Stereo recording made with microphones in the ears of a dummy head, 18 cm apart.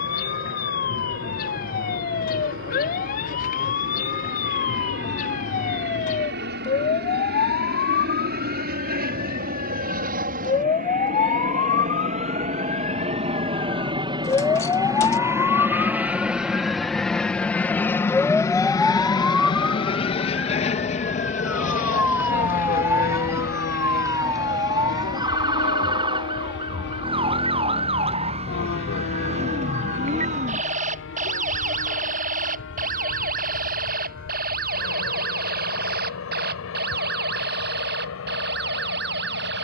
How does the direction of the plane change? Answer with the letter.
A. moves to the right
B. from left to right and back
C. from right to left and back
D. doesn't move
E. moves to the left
E.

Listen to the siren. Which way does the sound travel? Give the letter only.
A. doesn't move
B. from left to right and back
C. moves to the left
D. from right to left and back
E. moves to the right
E.